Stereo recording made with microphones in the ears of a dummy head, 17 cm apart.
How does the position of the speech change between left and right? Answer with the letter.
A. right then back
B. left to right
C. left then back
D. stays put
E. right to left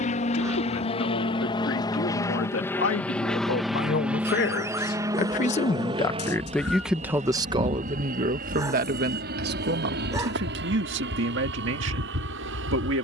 B.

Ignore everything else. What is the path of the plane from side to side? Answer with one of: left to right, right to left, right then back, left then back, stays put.
left to right.